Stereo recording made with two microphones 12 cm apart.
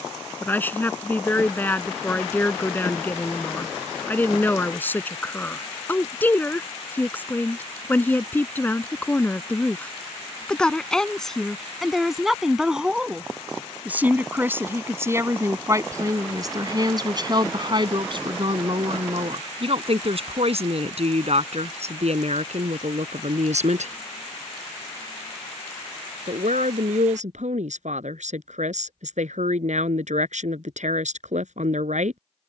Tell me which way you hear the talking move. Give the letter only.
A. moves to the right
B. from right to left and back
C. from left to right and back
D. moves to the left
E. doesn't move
A.